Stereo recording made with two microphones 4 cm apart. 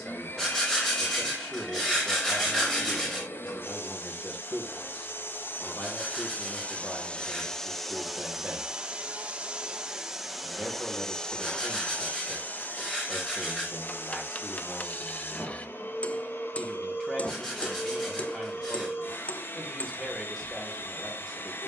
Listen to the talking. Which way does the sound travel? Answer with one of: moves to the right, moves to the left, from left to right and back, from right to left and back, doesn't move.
doesn't move.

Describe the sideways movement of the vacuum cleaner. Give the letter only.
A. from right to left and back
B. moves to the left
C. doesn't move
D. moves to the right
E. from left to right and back
E.